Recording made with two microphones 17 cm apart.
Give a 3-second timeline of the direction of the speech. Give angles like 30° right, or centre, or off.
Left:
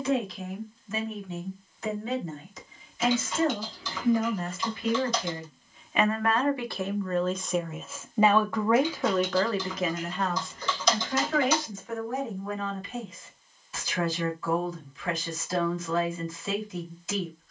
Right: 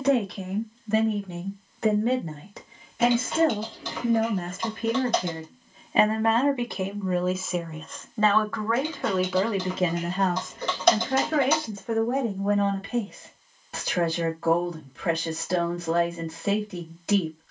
70° right, 50° right, centre, 40° right, 70° right, 70° right.